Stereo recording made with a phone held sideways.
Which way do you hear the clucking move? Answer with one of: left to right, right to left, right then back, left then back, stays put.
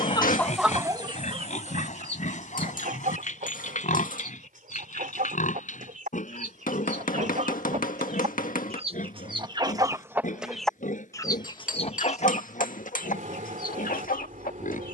right then back.